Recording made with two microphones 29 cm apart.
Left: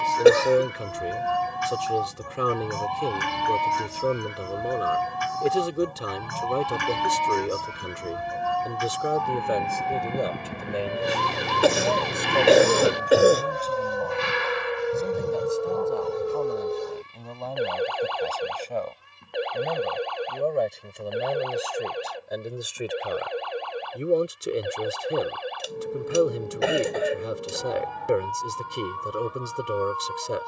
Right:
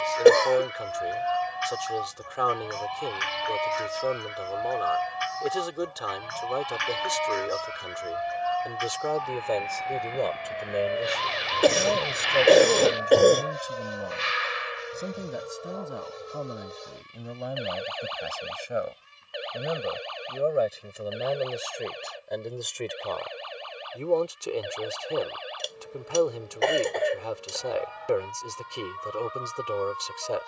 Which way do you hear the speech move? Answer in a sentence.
You can hear the speech go right and come back.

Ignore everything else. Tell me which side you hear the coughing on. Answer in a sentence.
You can hear the coughing in the centre.